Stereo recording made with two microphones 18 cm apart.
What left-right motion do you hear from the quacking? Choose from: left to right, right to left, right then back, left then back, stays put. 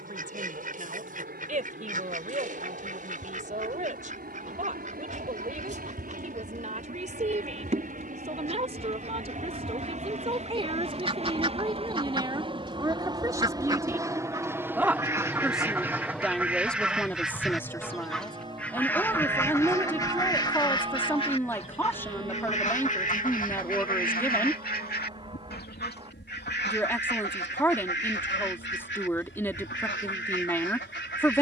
right to left.